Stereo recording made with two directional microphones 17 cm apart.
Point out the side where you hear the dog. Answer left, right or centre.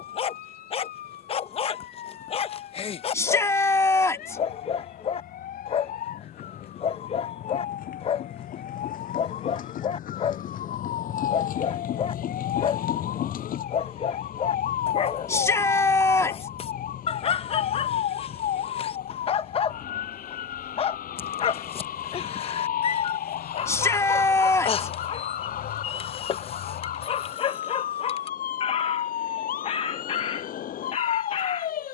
left.